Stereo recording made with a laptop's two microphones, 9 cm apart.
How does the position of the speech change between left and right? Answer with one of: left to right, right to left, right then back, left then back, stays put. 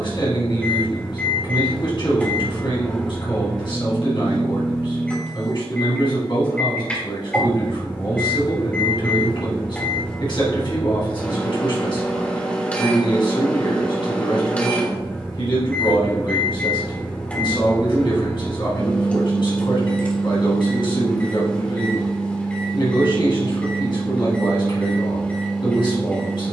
stays put.